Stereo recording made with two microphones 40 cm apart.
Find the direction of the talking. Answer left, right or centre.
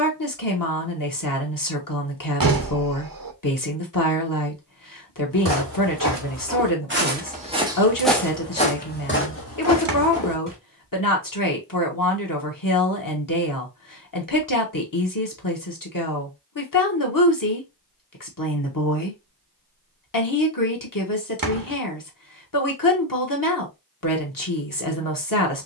left.